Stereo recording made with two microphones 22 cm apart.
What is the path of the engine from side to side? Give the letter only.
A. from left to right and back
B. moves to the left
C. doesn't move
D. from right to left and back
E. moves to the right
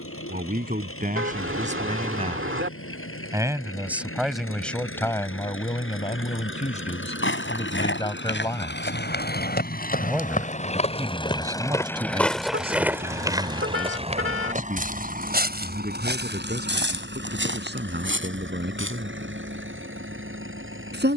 E.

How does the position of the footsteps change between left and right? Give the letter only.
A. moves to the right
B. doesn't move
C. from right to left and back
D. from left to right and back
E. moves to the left
A.